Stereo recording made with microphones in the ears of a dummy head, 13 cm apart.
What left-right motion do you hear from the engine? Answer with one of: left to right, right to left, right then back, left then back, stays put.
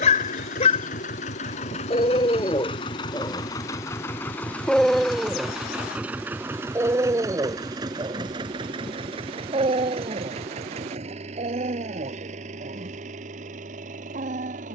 left to right.